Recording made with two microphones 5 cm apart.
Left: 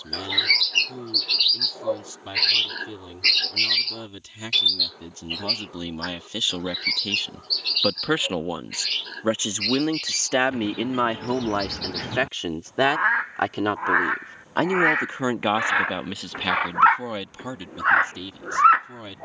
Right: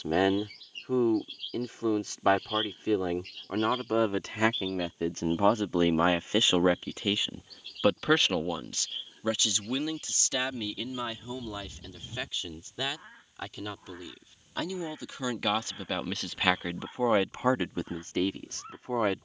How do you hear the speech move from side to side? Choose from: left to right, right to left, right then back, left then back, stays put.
left then back.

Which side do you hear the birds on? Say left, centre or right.
left.